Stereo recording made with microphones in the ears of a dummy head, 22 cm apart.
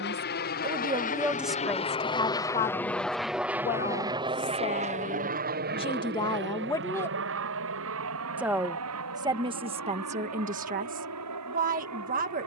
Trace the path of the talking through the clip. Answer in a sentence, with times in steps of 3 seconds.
You can hear the talking in the centre from 0 s, on the left from 3 s, in the centre from 6 s and on the right from 9 s.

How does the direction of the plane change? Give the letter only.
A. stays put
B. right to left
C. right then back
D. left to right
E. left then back
D.